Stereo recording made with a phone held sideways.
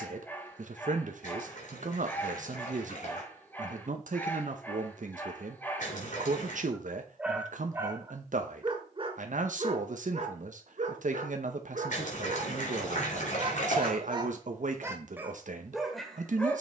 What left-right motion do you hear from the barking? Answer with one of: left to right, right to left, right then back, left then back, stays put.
right then back.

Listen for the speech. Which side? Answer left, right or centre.
right.